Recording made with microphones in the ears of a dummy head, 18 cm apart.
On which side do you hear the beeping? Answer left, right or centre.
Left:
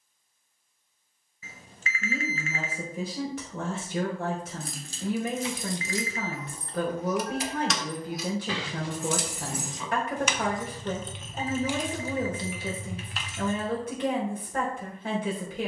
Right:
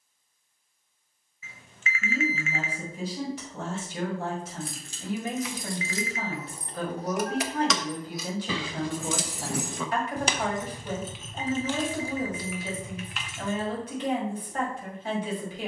left.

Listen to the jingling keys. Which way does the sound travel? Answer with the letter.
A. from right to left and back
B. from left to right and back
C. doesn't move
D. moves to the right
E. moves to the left
B.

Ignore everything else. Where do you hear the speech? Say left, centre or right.
left.